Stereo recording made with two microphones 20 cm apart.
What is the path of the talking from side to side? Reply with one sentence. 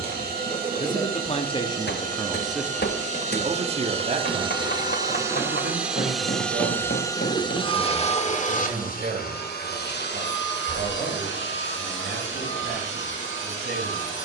You can hear the talking move to the right.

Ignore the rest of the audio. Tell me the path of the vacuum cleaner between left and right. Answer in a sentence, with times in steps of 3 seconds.
In this clip you hear the vacuum cleaner on the right from 0 s and on the left from 6 s.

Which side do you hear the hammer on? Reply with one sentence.
In this clip you hear the hammer on the left.